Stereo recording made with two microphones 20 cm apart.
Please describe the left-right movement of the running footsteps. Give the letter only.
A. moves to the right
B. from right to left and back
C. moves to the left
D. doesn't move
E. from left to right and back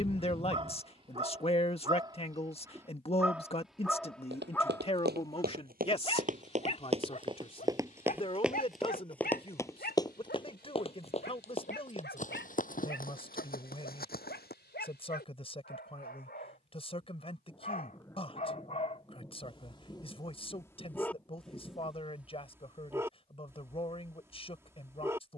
C.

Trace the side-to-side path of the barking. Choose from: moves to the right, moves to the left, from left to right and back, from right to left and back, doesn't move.
from right to left and back.